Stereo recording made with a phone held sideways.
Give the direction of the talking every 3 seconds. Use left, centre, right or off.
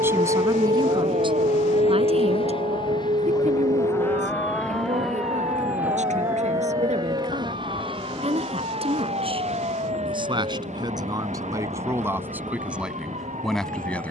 right, right, right, right, centre.